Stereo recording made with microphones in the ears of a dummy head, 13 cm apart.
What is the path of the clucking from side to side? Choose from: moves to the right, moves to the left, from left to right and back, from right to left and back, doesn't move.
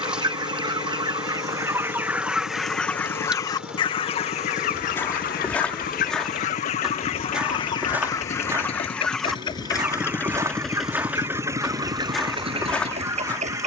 from right to left and back.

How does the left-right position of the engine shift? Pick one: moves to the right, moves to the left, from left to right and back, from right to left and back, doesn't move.
moves to the right.